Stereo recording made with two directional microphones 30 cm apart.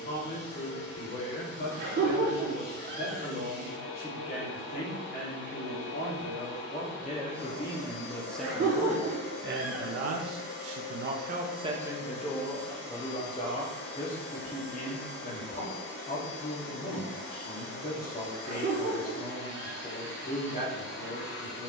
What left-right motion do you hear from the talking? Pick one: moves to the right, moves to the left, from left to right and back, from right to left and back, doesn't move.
from left to right and back.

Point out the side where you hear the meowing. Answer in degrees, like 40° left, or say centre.
40° right.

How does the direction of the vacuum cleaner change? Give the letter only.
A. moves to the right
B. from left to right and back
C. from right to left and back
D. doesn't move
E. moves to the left
D.